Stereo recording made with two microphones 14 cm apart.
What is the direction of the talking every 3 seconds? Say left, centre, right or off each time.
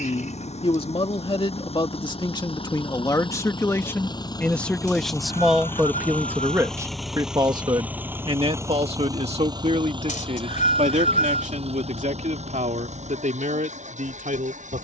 left, centre, right, right, right.